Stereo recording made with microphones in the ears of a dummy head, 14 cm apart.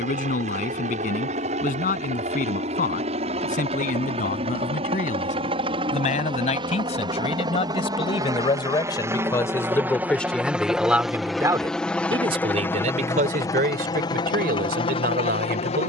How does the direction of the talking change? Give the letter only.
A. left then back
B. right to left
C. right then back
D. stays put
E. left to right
E.